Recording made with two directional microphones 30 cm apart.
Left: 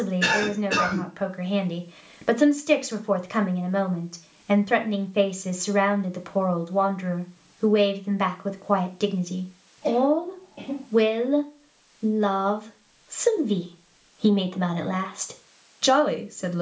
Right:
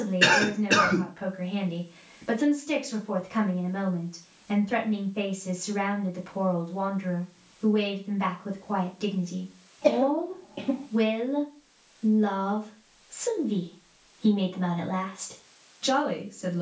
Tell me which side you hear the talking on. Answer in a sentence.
In this clip you hear the talking on the left.